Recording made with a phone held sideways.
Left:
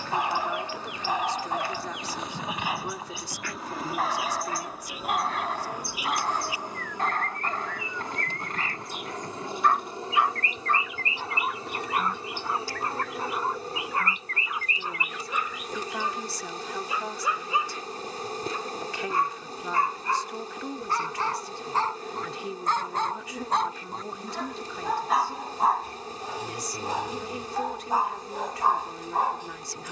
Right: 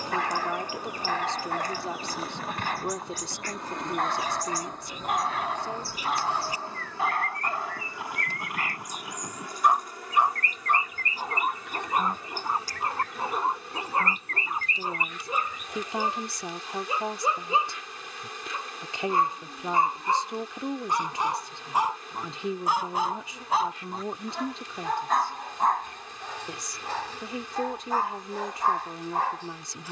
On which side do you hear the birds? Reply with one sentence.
You can hear the birds on the right.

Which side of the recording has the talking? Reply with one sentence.
In this clip you hear the talking on the right.